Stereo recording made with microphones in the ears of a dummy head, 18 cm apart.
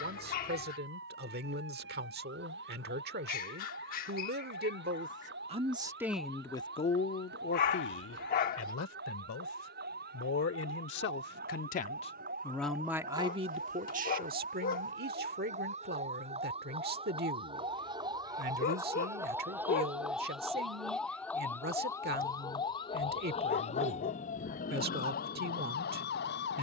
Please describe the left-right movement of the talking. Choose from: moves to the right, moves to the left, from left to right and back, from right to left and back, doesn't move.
from right to left and back.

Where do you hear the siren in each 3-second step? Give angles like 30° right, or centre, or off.
60° right, 60° right, 50° right, 50° right, 40° right, 30° right, 10° right, 20° left, 50° left.